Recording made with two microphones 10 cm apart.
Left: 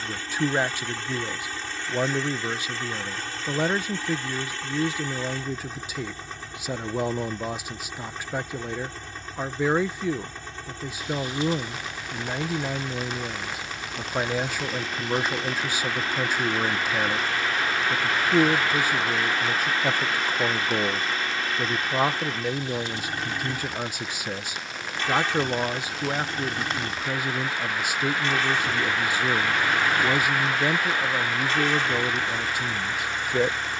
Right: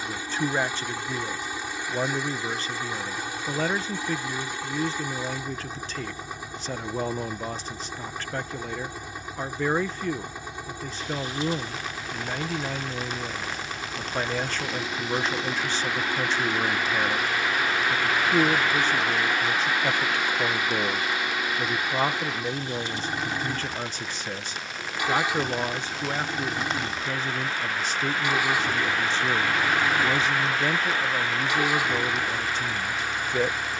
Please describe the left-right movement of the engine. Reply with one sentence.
In this clip you hear the engine stay put.